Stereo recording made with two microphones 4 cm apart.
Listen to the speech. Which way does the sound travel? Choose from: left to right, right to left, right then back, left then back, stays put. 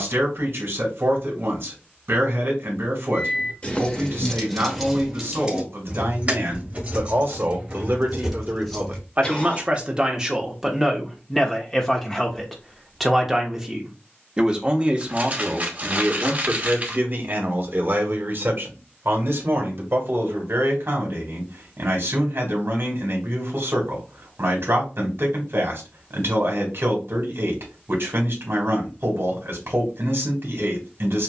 left then back.